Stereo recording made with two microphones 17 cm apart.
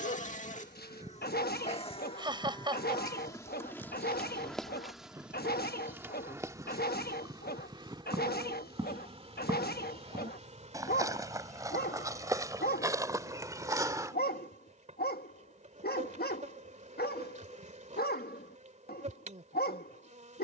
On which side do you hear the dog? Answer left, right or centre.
left.